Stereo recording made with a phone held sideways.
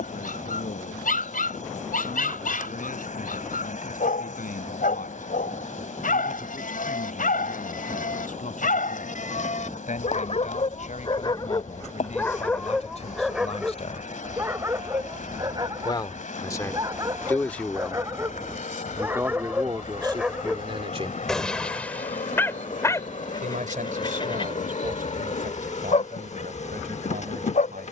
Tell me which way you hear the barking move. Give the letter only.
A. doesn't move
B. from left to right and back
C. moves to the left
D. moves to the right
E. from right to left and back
B.